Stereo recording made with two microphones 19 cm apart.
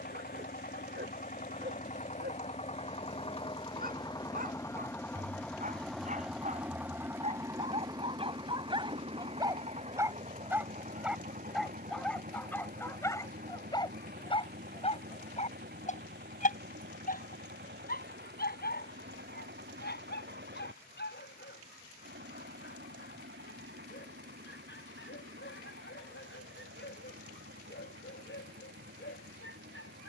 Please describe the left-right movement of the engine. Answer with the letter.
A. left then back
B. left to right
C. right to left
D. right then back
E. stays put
B.